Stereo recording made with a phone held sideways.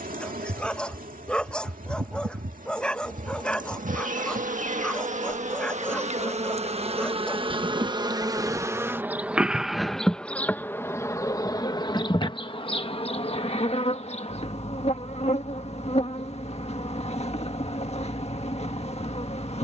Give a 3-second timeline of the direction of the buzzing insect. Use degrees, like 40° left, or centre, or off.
70° right, 60° right, 40° right, 10° left, 40° left, 50° left, 50° left.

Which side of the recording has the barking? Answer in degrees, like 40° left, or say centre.
10° left.